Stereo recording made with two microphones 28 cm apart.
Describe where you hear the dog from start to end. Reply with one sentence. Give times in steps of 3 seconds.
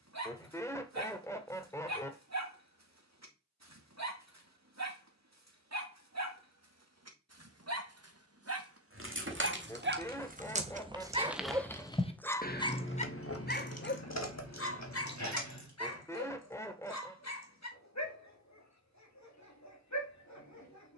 You can hear the dog on the right from 0 s and on the left from 12 s.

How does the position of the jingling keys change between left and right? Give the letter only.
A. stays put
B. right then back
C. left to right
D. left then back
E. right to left
E.